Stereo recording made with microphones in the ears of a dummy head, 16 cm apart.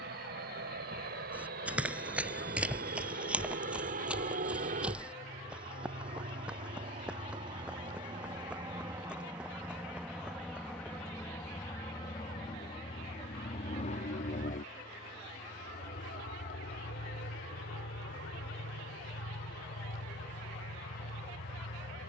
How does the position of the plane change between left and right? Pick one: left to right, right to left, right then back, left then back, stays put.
right to left.